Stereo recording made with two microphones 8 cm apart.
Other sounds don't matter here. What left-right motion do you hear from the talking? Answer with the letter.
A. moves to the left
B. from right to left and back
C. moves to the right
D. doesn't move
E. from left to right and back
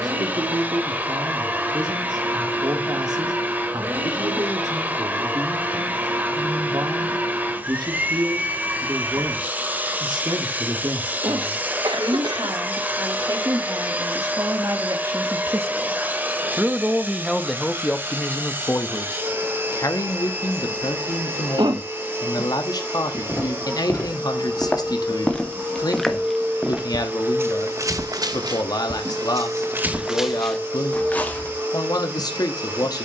A.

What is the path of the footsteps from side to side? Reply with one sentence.
In this clip you hear the footsteps go right and come back.